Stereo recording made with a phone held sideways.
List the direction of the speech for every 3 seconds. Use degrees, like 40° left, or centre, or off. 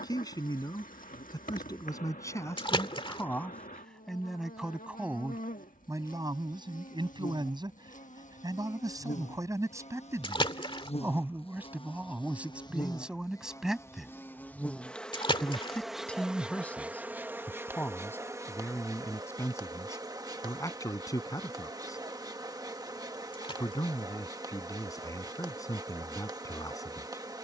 20° left, centre, 30° right, 20° right, 10° right, 10° left, 20° left, 20° left, 20° left.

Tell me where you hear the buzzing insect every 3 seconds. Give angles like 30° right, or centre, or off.
70° left, 70° left, 60° left, 50° left, 20° left, 10° right, 30° right, 30° right, 30° right.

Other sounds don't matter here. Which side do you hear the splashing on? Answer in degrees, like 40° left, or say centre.
40° left.